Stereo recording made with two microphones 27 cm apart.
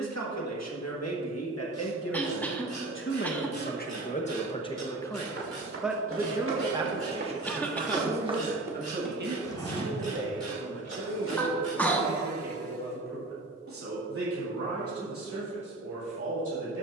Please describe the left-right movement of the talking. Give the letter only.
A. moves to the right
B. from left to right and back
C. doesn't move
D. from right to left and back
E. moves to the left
A.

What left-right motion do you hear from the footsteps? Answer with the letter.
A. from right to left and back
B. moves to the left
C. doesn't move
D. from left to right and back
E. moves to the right
B.